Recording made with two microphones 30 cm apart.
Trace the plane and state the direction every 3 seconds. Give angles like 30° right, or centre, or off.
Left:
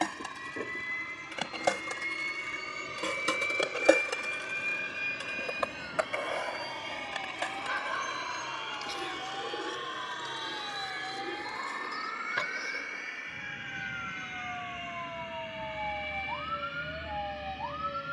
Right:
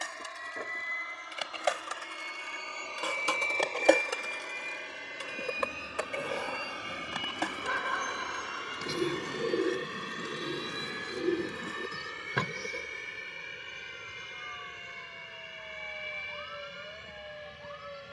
30° left, 10° left, 10° right, 30° right, 40° right, 50° right.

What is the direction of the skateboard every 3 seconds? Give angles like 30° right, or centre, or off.
60° left, 10° right, 50° right, 70° right, off, off.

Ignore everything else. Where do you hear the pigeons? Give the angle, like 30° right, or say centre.
60° right.